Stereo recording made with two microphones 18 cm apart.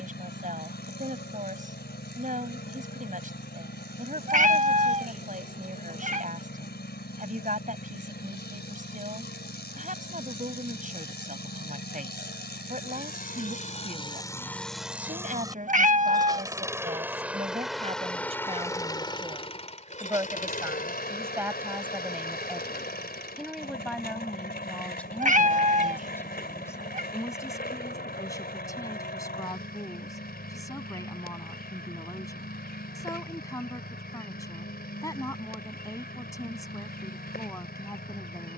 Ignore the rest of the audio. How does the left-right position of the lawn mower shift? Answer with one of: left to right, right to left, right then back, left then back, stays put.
right then back.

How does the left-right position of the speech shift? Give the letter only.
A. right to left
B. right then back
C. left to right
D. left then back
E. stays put
A.